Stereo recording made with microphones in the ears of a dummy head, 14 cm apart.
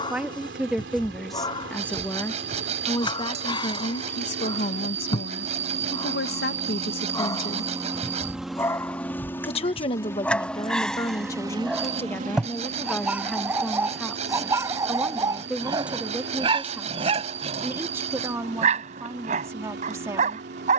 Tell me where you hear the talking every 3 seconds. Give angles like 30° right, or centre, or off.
centre, 50° left, 60° left, 30° left, 10° left, 10° right, 20° right.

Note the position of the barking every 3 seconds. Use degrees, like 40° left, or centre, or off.
30° left, 30° left, 20° left, 10° left, 10° right, 30° right, 50° right.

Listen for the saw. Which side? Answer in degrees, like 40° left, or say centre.
40° right.